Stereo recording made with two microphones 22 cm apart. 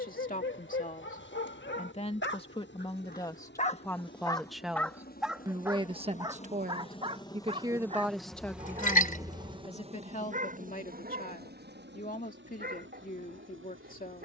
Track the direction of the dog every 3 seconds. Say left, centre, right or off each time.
left, centre, right, right, right.